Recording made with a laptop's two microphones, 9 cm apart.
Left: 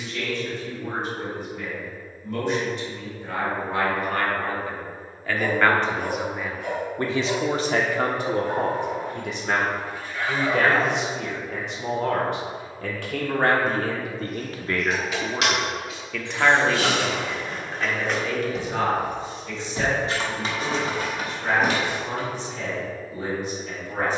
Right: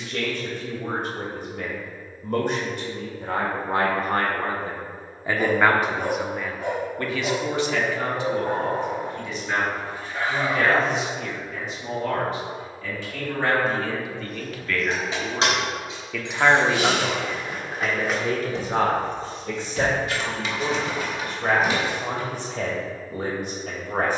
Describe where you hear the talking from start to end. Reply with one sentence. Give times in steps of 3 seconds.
You can hear the talking on the right from 0 s, on the left from 6 s, in the centre from 15 s and on the right from 18 s.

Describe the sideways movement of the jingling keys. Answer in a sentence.
You can hear the jingling keys move from right to left.